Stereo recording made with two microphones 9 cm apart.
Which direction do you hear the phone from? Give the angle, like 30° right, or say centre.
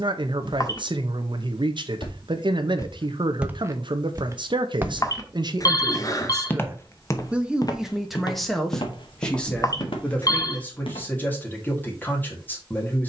40° left.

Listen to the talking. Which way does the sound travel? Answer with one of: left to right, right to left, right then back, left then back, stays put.
right to left.